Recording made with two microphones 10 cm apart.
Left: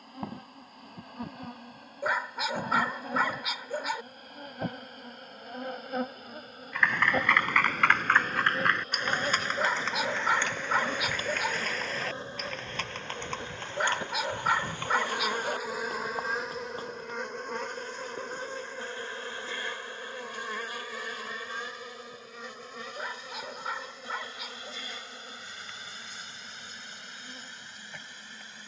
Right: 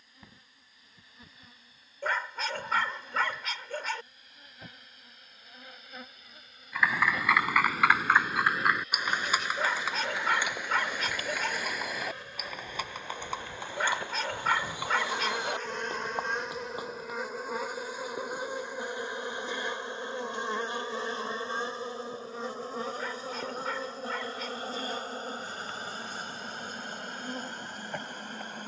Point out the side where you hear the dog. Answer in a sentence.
In this clip you hear the dog in the centre.